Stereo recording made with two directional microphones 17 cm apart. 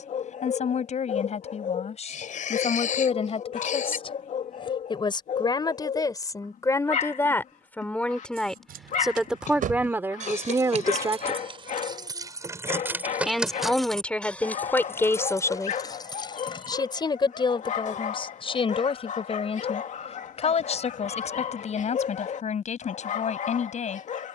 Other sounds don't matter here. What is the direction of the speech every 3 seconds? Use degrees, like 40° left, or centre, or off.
40° left, 30° left, 10° left, 10° right, 10° left, 20° left, 40° left, 40° left.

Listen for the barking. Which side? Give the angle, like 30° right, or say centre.
50° left.